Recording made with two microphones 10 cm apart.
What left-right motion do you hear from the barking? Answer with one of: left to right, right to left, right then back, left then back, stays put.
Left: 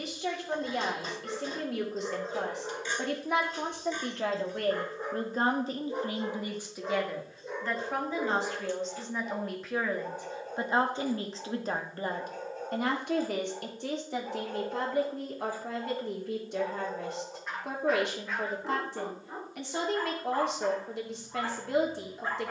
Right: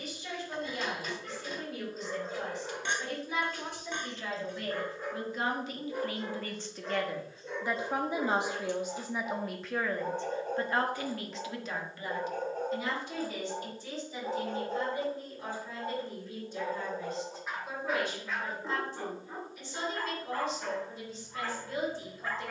right then back.